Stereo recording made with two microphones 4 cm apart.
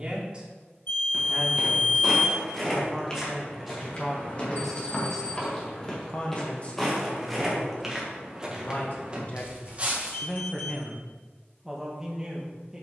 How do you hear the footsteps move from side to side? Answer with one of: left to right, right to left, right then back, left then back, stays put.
left then back.